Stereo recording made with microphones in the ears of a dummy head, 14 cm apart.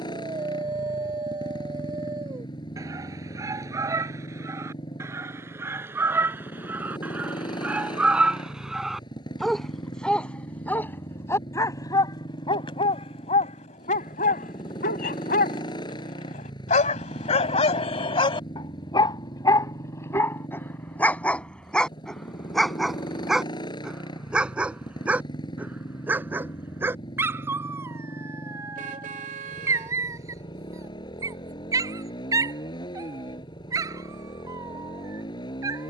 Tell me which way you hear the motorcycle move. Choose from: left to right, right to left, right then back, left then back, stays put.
stays put.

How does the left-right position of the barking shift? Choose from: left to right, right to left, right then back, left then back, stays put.
left then back.